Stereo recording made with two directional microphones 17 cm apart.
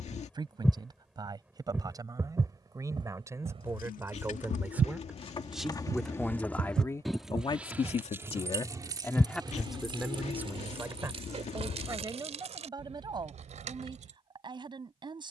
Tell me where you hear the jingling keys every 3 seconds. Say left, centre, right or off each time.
off, left, centre, right, right.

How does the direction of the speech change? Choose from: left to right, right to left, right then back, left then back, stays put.
left then back.